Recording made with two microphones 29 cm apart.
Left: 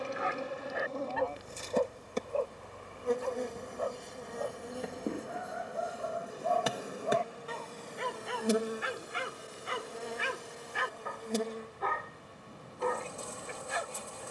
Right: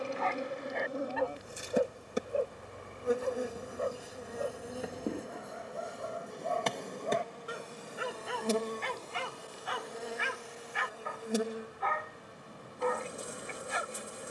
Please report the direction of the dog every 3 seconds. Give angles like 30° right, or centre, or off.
10° right, 30° right, 10° right, 40° left, 50° left.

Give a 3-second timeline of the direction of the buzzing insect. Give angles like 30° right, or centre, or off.
10° right, centre, 10° left, centre, 20° right.